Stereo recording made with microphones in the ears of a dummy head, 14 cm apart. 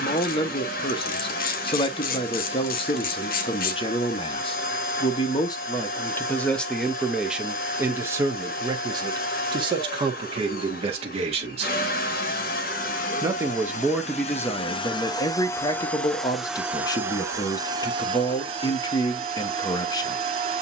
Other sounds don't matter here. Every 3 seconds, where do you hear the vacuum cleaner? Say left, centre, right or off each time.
left, left, left, left, left, centre, right.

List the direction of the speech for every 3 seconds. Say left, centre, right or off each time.
left, left, centre, right, centre, left, left.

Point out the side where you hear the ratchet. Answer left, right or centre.
left.